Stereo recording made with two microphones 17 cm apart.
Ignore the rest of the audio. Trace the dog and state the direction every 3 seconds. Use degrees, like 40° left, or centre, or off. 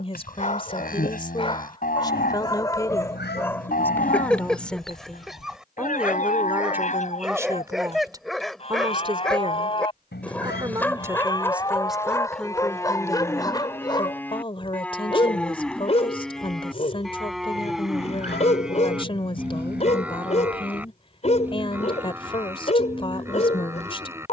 30° left, 10° left, centre, 10° left, 20° left, 40° left, 40° left, 40° left.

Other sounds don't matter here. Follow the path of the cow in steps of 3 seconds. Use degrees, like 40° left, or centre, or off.
60° left, 60° left, 40° left, 30° left, 10° left, centre, 10° right, 10° right.